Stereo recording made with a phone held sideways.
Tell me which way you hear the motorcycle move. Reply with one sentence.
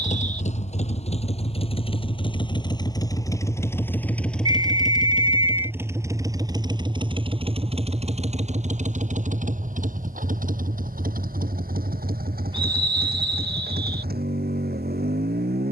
You can hear the motorcycle travel towards the right.